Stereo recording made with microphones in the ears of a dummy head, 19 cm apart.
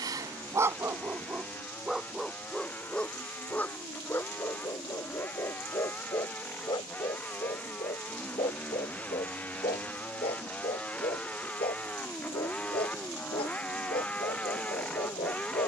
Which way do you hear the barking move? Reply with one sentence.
In this clip you hear the barking move from right to left.